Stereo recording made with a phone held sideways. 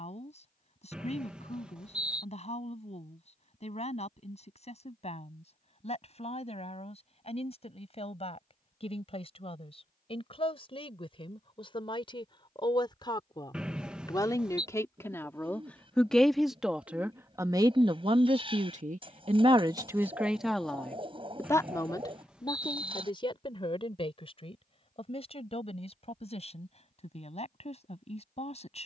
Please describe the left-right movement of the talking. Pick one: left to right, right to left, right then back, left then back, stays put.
right then back.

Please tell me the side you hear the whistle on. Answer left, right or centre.
centre.